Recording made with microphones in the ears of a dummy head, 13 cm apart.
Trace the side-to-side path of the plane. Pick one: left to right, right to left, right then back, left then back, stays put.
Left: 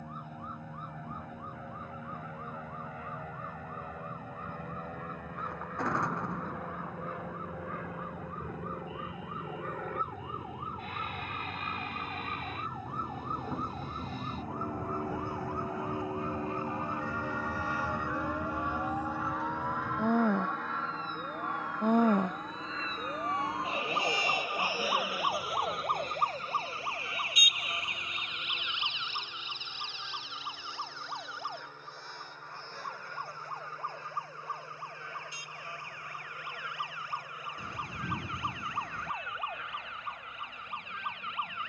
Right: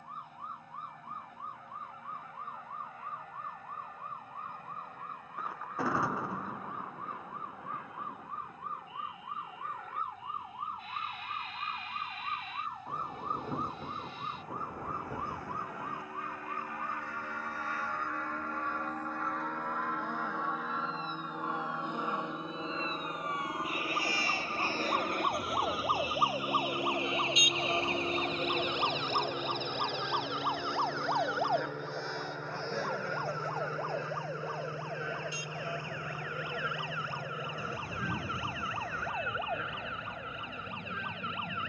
left to right.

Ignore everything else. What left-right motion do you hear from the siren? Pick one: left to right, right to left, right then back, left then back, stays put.
left to right.